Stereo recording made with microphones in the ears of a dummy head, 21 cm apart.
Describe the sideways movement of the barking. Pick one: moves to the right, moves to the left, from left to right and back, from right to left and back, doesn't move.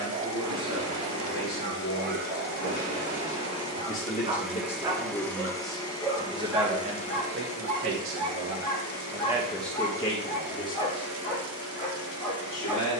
moves to the left.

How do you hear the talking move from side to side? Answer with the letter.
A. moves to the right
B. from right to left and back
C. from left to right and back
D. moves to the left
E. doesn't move
C.